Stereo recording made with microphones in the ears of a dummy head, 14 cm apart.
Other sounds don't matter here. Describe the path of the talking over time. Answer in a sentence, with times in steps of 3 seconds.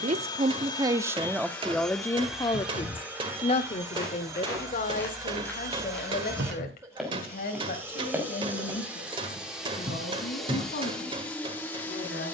You can hear the talking in the centre from 0 s and on the left from 3 s.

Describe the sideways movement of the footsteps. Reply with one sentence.
You can hear the footsteps go from the left side to the right.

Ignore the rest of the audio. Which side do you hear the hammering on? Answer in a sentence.
In this clip you hear the hammering on the right.